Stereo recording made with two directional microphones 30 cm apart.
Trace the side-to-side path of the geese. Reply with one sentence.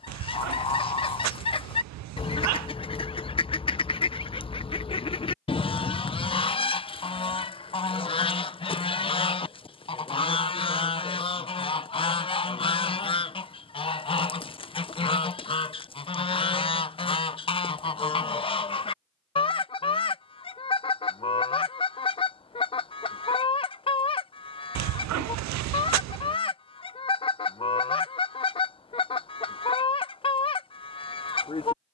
You can hear the geese stay in one place.